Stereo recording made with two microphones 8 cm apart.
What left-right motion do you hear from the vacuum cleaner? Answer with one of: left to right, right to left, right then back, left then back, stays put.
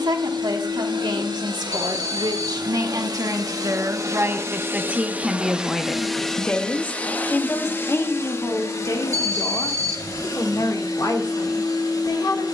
right to left.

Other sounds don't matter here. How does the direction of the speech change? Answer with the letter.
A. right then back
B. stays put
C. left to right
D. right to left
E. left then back
D.